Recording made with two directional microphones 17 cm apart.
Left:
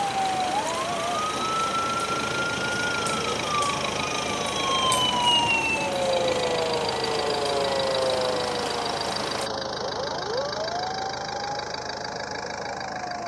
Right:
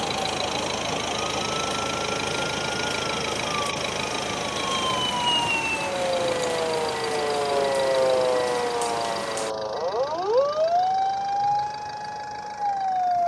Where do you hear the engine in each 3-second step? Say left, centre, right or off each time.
right, centre, left, left, left.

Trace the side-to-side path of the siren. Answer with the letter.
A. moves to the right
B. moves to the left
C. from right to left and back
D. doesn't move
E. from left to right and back
A.